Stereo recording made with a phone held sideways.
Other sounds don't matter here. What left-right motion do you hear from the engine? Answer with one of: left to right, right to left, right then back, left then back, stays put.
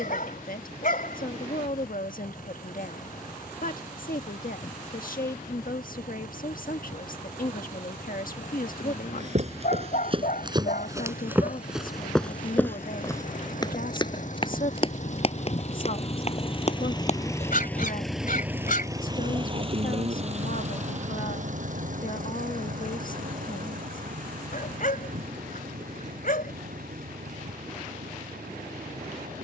left to right.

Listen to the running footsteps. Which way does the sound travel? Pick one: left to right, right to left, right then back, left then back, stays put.
right to left.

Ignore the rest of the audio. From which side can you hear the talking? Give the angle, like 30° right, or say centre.
80° left.